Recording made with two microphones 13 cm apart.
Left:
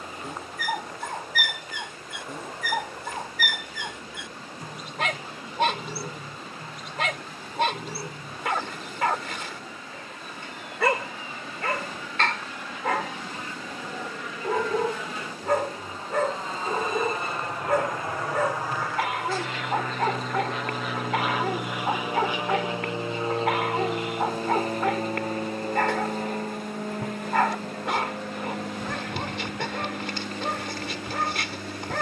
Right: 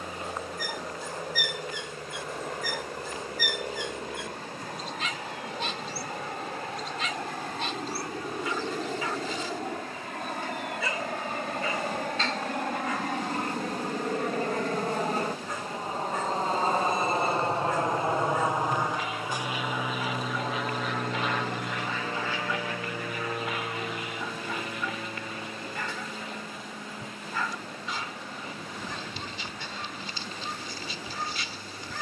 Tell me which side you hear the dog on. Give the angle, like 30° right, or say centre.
70° left.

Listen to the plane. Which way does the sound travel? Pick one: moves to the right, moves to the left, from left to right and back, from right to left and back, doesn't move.
moves to the left.